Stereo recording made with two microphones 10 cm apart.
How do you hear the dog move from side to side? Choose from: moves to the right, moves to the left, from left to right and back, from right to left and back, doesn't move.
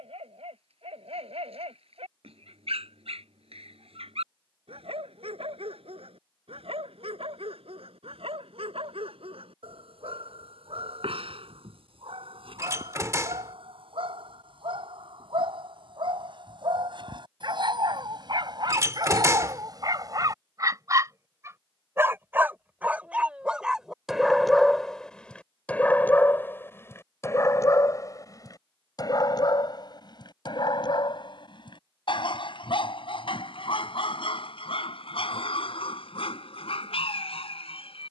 moves to the left.